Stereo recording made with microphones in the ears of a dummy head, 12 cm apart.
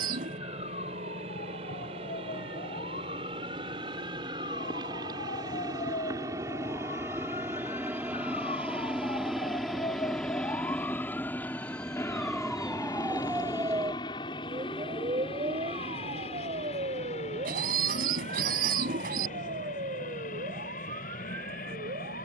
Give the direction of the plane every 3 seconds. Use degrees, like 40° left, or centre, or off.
50° right, 30° right, 10° right, 10° left, 30° left, 40° left, 50° left, 60° left.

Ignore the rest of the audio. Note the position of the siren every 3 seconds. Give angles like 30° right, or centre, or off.
70° left, 60° left, 50° left, 20° left, 10° right, 50° right, 60° right, 70° right.